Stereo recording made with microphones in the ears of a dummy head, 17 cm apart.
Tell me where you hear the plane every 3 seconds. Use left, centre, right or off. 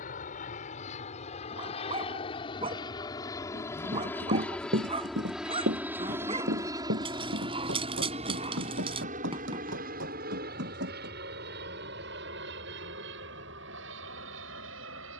left, centre, right, right, right.